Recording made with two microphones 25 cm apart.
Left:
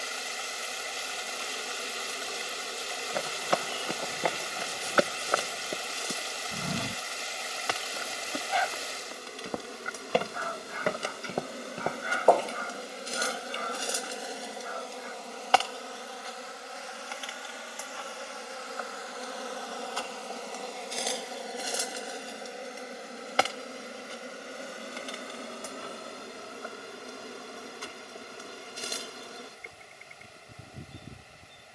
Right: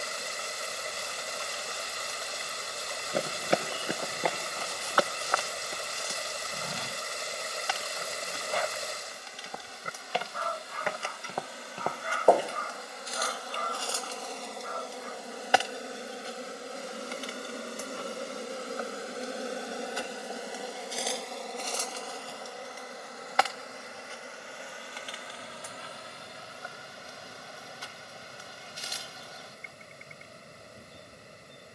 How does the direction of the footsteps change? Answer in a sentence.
In this clip you hear the footsteps go left and come back.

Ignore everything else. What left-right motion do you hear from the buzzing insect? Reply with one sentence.
You can hear the buzzing insect move from left to right and back again.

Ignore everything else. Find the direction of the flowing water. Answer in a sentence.
In this clip you hear the flowing water on the right.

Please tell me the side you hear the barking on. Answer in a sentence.
You can hear the barking on the right.